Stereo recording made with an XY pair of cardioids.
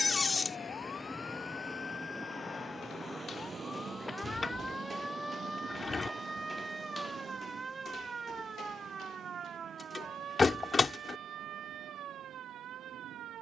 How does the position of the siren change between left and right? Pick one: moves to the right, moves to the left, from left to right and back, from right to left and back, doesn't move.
moves to the right.